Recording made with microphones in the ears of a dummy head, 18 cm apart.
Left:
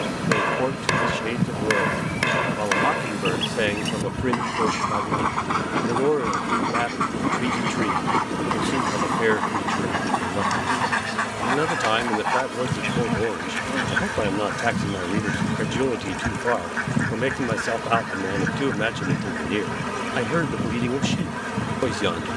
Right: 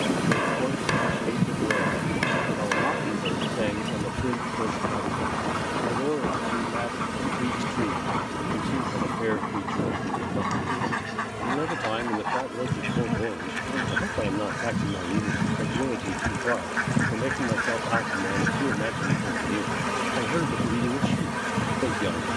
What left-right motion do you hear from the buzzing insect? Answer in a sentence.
In this clip you hear the buzzing insect go left and come back.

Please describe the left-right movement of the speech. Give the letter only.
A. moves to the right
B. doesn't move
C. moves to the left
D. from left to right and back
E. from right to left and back
B.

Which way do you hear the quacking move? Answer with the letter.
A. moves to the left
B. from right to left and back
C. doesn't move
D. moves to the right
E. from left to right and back
B.